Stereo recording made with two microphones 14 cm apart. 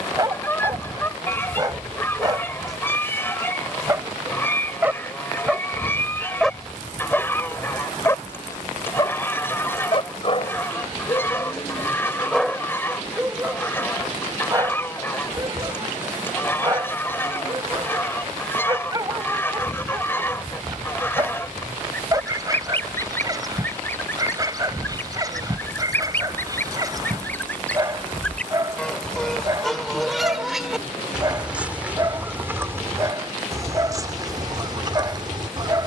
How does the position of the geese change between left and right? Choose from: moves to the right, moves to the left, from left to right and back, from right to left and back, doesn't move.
moves to the right.